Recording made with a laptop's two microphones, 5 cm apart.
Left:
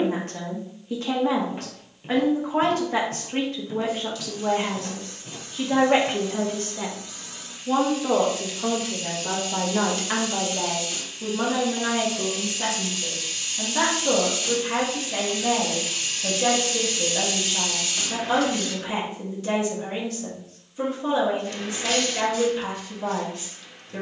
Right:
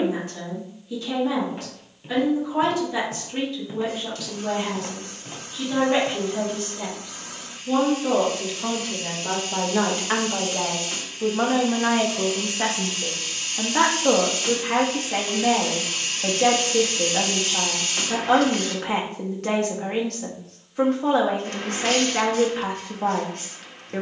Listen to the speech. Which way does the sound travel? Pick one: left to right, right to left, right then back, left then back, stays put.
left to right.